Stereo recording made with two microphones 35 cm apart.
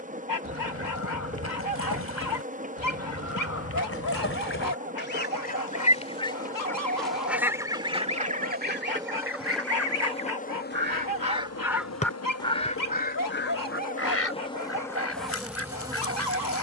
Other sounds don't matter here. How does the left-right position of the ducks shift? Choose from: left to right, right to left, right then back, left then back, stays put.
right then back.